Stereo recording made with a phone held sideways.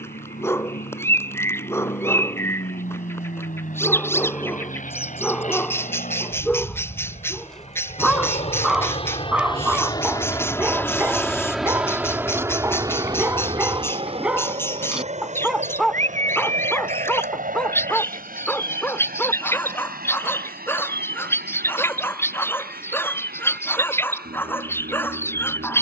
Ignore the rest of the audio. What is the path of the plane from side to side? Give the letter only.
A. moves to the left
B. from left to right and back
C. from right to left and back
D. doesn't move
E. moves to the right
E.